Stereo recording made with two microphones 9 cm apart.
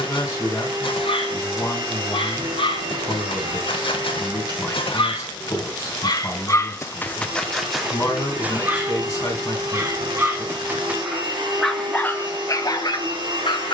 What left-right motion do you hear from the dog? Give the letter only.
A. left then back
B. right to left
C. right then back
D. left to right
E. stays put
C.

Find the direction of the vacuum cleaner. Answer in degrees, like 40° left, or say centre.
70° right.